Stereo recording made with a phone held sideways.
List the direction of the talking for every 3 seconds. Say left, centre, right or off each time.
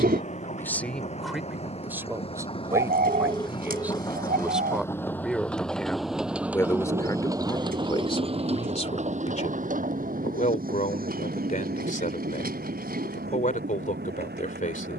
centre, centre, left, left, left.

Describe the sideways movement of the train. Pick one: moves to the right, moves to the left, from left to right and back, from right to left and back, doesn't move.
moves to the right.